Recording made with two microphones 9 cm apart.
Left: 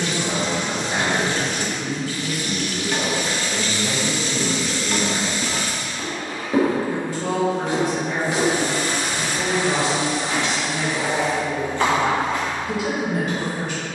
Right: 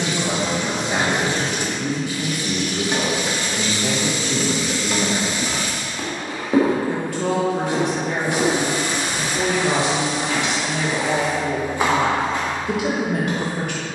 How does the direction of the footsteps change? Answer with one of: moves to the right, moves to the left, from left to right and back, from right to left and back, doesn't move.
from right to left and back.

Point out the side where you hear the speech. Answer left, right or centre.
right.